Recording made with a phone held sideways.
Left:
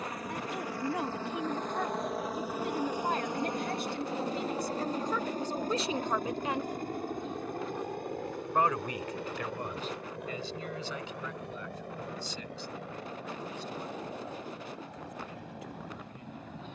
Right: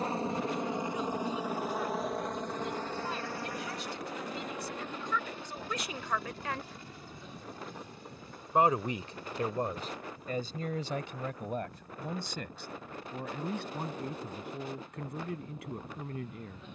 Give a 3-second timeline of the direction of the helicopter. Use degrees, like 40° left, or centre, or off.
10° right, 30° left, 50° left, 60° left, 70° left, 70° left.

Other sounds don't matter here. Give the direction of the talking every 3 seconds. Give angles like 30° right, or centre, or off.
70° left, 40° left, centre, 40° right, 60° right, 70° right.